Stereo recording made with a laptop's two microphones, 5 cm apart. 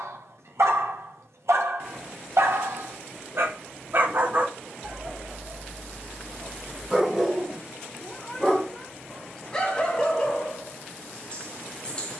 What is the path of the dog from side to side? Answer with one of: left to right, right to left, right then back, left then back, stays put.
right to left.